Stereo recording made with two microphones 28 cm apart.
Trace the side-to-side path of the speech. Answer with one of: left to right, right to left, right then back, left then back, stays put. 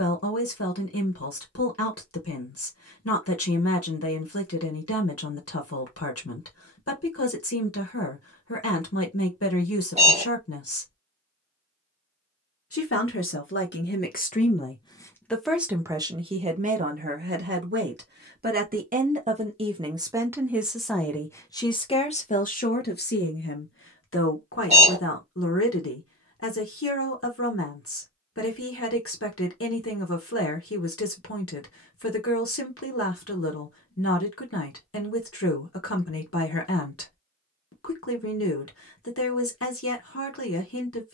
right then back.